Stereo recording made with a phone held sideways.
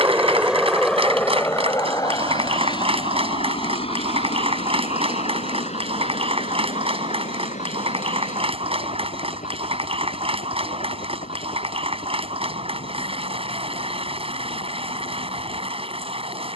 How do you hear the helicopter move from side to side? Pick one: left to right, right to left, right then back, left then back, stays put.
right to left.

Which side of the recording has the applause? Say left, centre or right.
right.